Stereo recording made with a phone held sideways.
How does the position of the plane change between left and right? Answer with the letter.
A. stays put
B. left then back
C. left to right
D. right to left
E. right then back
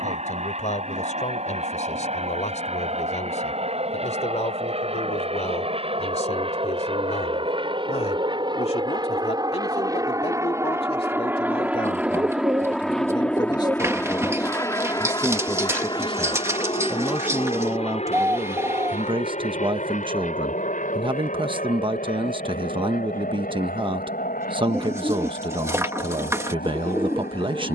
D.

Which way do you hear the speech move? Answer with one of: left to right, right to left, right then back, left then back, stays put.
left to right.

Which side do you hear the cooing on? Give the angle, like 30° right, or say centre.
20° right.